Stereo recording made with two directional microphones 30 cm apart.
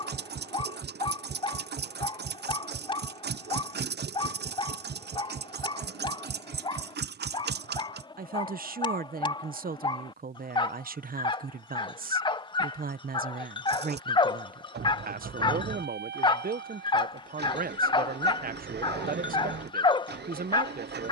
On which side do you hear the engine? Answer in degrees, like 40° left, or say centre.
30° right.